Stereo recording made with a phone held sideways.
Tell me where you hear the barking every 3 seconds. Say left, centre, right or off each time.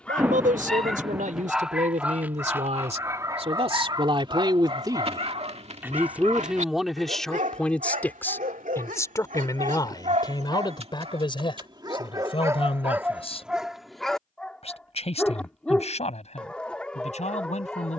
centre, right, right, right, centre, centre.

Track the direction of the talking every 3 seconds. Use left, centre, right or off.
right, right, centre, left, left, left.